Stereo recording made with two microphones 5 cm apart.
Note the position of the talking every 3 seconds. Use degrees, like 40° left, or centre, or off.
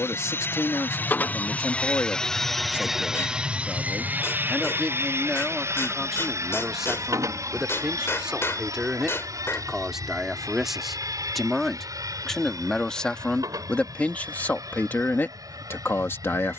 60° left, 20° left, 10° right, centre, 20° left, 50° left.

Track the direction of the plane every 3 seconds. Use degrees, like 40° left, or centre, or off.
30° left, 30° right, 60° right, 70° right, 80° right, 80° right.